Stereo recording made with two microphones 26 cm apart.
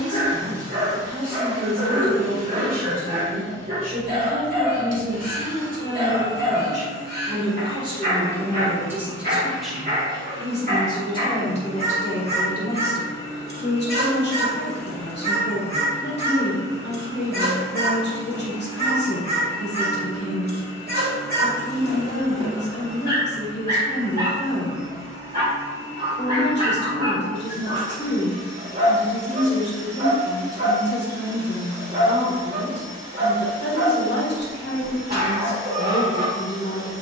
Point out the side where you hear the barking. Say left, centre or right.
right.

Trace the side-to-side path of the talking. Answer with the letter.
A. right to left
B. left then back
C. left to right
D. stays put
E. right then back
A.